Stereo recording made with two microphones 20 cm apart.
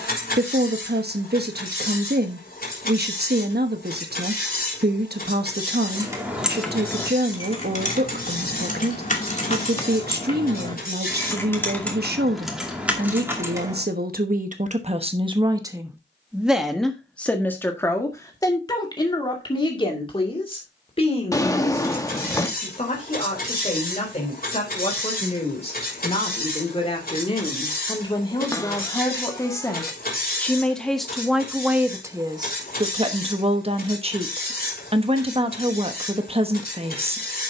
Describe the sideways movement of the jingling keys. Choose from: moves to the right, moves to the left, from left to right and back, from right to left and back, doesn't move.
from right to left and back.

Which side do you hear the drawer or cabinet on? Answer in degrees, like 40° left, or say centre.
20° left.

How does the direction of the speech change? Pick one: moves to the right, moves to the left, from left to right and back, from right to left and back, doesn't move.
from right to left and back.